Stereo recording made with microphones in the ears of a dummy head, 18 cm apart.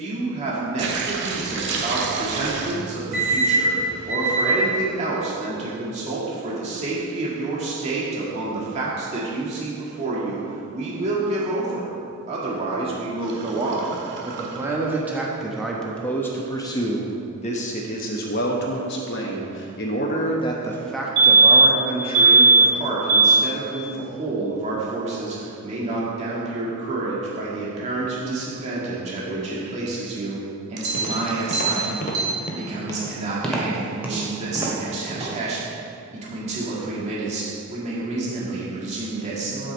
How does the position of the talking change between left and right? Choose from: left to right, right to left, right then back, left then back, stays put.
left then back.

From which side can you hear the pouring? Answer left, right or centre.
right.